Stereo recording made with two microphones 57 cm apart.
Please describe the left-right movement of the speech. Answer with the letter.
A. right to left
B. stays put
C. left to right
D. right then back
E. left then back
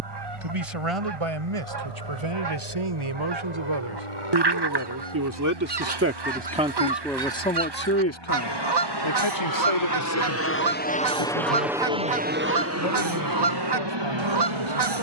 A.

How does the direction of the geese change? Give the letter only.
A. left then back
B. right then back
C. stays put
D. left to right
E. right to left
C.